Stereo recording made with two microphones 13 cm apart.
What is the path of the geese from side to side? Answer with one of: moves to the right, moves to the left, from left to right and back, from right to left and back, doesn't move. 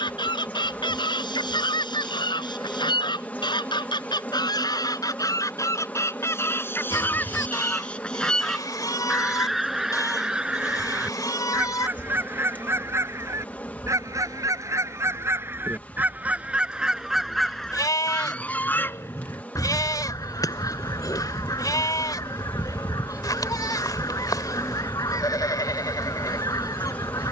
from left to right and back.